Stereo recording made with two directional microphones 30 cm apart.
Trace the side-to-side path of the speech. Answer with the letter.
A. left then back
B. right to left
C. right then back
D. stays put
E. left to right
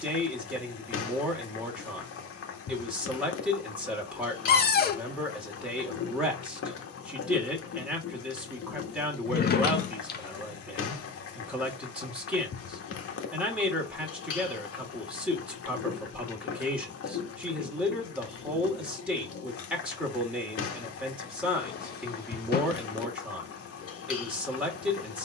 D.